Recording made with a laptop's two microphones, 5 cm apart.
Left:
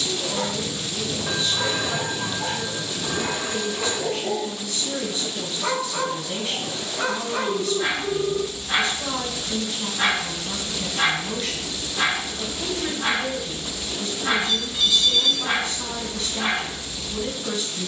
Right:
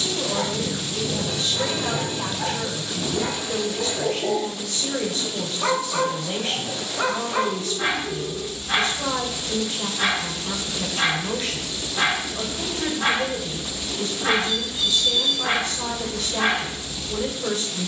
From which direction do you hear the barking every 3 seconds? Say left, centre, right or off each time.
right, right, right, centre, right, right.